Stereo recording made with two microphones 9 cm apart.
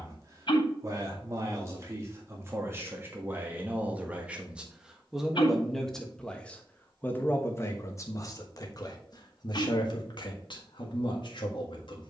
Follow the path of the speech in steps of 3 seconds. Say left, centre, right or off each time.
right, centre, left, left.